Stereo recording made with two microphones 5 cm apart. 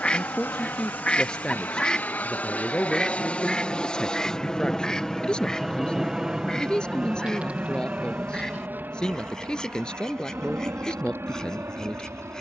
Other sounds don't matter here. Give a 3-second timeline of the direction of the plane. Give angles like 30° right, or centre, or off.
40° left, 10° left, 30° right, 50° right.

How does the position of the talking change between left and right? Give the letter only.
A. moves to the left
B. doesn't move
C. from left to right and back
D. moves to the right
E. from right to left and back
B.